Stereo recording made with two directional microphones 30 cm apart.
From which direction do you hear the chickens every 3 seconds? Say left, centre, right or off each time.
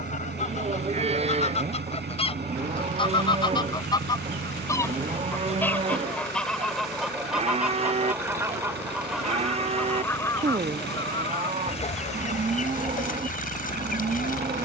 left, centre, centre, centre, left.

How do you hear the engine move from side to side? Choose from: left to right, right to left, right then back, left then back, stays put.
stays put.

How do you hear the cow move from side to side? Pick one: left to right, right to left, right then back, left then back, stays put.
stays put.